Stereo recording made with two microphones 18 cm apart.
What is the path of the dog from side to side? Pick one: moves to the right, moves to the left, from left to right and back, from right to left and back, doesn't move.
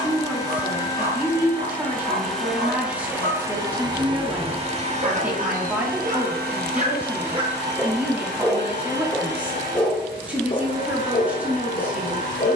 moves to the left.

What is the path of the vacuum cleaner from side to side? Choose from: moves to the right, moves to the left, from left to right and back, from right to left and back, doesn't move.
moves to the right.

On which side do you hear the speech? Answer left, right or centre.
centre.